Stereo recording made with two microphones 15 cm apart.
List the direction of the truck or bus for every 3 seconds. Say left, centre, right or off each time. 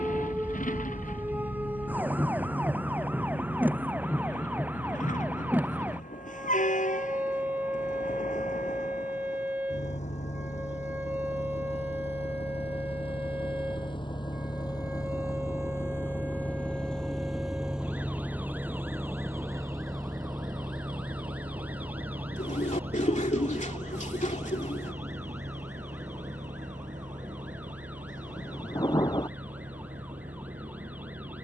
left, left, left, left, left, centre, right, right, right, right, right.